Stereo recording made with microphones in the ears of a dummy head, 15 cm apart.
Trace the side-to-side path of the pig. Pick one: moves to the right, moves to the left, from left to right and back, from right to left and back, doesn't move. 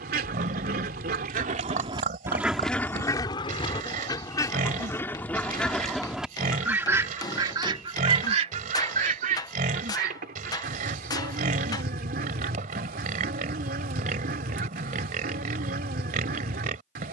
doesn't move.